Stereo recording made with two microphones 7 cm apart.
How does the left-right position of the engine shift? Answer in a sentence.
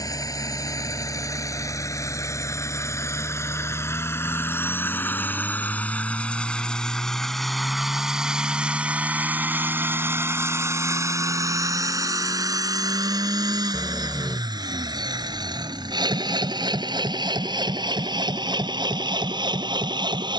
You can hear the engine move from left to right.